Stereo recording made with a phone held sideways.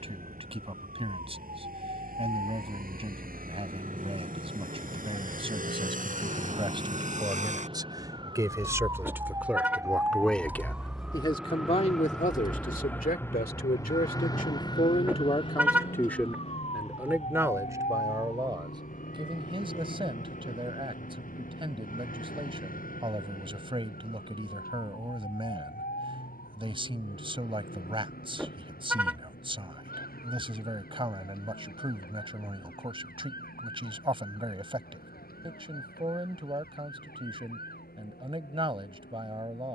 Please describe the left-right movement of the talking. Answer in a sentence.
In this clip you hear the talking move from right to left and back again.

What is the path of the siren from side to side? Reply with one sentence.
In this clip you hear the siren move from right to left.